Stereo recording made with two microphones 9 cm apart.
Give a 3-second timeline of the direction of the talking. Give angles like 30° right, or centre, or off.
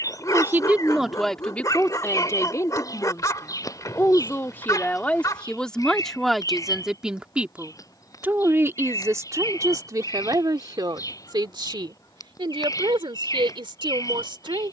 10° left, 20° left, 10° right, 40° right, 60° right.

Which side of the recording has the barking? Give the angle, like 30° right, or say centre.
40° left.